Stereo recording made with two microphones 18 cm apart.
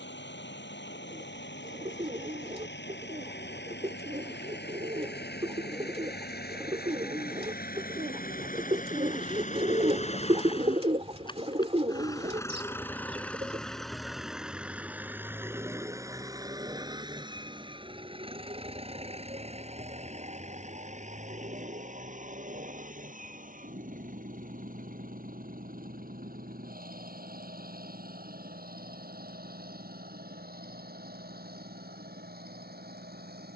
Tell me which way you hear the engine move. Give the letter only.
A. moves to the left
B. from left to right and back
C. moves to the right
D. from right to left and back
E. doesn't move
C.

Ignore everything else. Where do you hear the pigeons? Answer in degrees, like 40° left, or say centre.
30° right.